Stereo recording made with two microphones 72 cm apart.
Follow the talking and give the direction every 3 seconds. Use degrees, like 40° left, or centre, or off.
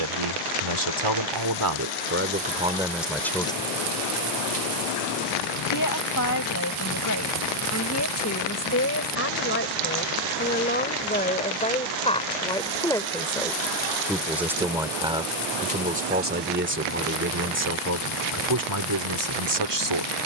30° right, 10° left, 20° left, 10° left, centre, 10° right, 30° right.